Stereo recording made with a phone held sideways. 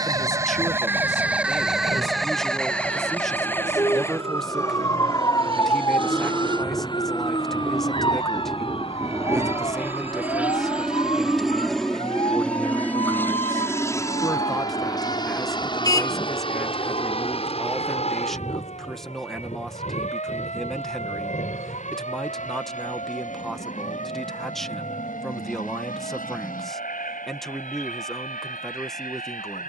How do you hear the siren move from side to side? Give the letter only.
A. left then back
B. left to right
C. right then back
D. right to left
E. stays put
D.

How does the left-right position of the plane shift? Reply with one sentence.
You can hear the plane move from right to left.